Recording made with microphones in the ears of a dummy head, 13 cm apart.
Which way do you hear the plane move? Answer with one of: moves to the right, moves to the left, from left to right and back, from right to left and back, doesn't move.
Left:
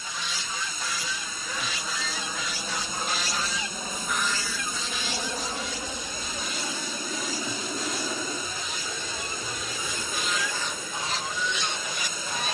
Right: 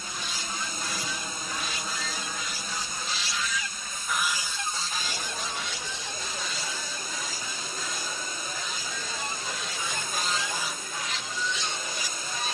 moves to the left.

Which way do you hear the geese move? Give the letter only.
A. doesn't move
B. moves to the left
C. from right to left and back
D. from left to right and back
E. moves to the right
D.